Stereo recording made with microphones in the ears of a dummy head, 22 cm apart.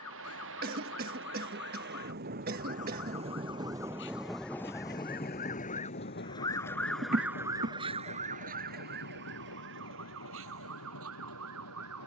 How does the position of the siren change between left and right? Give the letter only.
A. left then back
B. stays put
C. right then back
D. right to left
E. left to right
E.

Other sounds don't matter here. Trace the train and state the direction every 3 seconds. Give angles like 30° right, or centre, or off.
50° right, centre, 60° left, 70° left.